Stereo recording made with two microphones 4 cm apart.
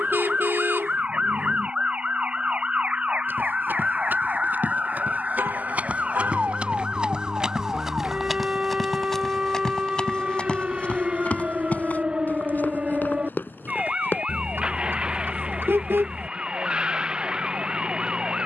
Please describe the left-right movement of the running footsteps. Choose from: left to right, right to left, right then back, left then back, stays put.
right to left.